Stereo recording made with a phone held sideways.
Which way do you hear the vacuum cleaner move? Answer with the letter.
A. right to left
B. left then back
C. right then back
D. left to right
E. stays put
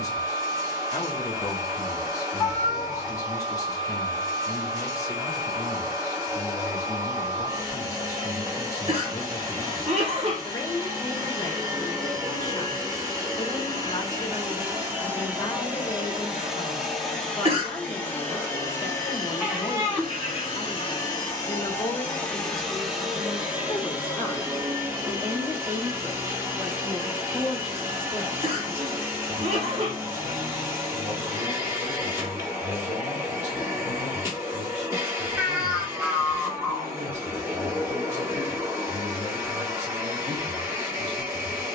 B.